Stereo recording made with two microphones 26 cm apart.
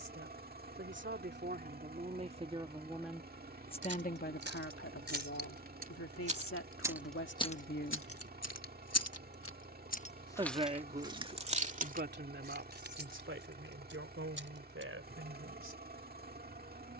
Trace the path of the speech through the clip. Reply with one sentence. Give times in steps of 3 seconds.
You can hear the speech on the right from 0 s, on the left from 3 s and on the right from 9 s.